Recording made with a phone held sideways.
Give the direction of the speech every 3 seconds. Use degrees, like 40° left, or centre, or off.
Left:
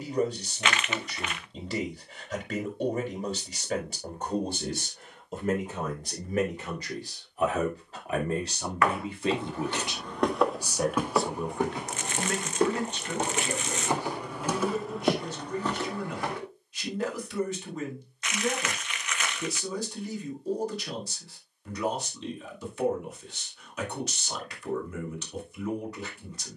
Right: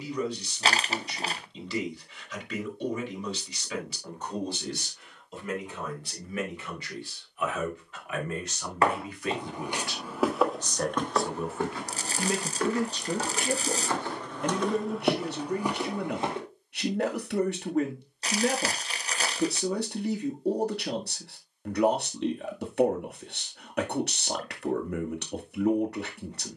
50° left, 50° left, 40° left, 10° left, 50° right, 70° right, 70° right, 70° right, 70° right.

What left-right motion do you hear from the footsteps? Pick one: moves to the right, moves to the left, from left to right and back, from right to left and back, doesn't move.
from right to left and back.